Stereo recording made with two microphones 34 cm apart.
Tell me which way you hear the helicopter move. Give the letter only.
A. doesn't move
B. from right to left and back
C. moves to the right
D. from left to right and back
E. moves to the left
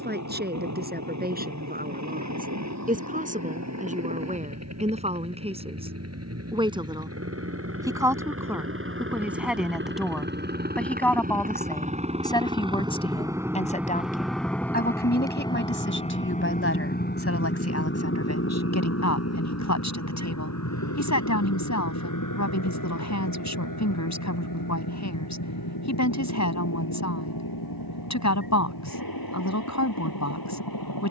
E.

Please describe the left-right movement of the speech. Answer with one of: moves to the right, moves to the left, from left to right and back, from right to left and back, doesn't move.
moves to the left.